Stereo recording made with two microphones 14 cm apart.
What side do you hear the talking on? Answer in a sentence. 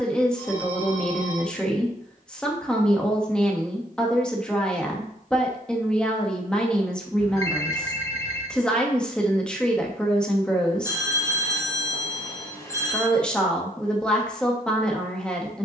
You can hear the talking in the centre.